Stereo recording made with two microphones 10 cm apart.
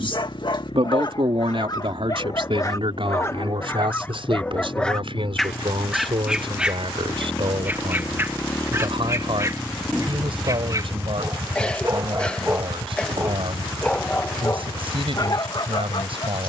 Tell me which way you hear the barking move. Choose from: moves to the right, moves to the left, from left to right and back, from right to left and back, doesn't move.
from left to right and back.